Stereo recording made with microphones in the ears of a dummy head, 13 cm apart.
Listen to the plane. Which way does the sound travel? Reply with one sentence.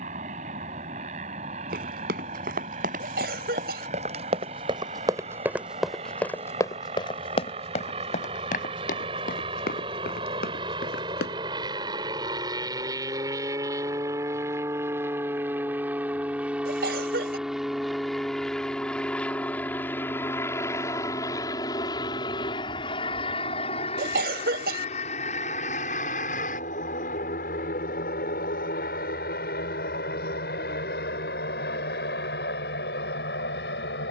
You can hear the plane move to the left.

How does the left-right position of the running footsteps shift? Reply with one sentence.
In this clip you hear the running footsteps travel towards the left.